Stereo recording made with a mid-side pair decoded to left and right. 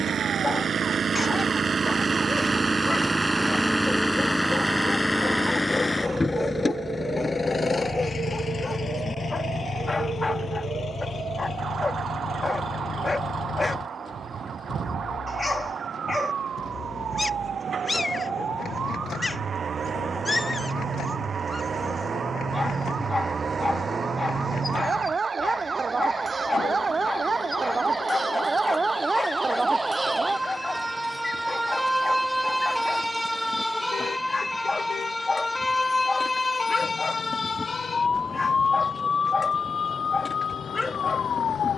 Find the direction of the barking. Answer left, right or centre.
left.